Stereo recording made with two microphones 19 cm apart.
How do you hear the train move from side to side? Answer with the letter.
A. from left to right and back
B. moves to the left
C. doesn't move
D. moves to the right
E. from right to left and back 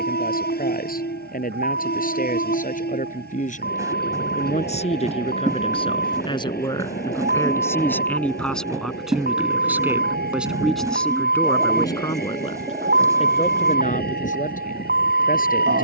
C.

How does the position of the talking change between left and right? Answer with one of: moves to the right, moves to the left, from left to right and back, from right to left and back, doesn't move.
from left to right and back.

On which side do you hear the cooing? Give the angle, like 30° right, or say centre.
20° right.